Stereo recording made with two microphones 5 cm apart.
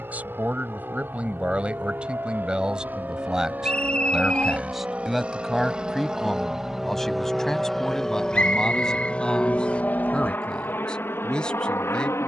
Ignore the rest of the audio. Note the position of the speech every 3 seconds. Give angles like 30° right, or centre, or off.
20° right, 10° right, 10° left, 20° left.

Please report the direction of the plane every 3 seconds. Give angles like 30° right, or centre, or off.
50° right, 30° right, centre, 40° left.